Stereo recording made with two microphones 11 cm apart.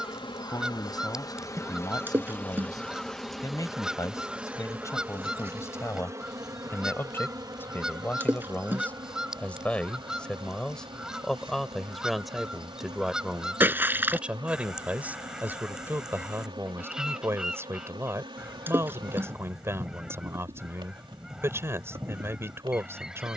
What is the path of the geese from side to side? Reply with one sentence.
You can hear the geese stay put.